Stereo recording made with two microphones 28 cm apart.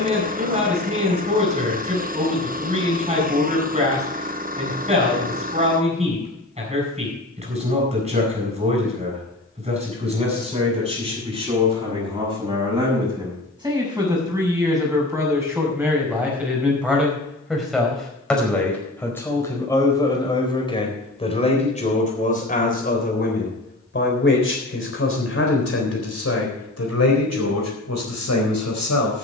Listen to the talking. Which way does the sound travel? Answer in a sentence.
In this clip you hear the talking move to the left.